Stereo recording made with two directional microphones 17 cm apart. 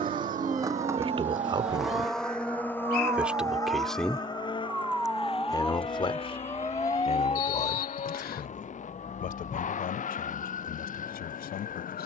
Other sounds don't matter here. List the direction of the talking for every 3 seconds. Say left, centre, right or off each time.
right, centre, left, left.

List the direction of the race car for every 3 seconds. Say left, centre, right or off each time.
centre, left, left, left.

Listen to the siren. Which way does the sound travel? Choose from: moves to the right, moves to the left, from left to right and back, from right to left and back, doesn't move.
moves to the left.